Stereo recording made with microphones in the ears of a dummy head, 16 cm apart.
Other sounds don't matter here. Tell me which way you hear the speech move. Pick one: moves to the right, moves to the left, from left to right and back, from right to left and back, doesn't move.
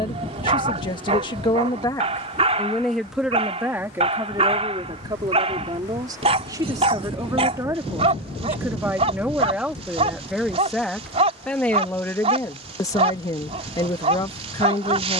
from left to right and back.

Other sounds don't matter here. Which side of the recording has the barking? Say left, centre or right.
right.